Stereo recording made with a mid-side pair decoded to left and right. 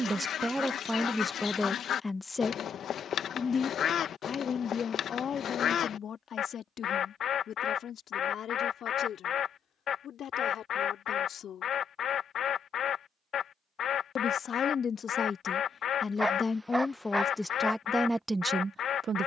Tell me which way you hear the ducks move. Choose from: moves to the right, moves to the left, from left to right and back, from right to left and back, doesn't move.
doesn't move.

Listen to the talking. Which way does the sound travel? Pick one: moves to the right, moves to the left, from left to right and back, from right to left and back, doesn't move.
from right to left and back.